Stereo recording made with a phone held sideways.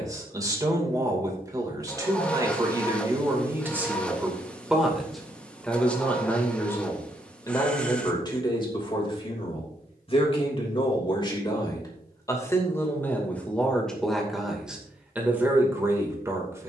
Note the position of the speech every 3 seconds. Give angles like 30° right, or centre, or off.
20° right, 10° right, 20° left, 30° left, 10° left, 20° right.